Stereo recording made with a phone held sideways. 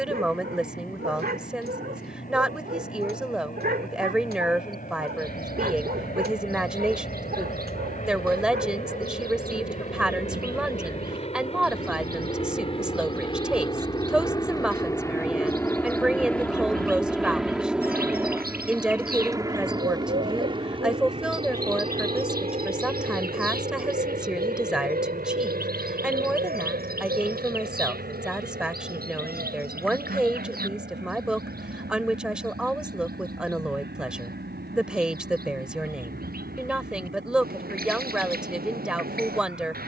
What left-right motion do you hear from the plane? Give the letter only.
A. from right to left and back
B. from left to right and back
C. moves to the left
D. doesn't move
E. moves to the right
E.